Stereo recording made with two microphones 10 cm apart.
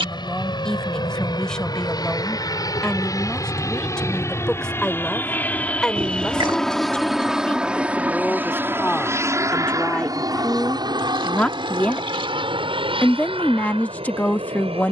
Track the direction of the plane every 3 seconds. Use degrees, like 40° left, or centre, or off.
50° left, 30° left, 10° right, 40° right, 60° right.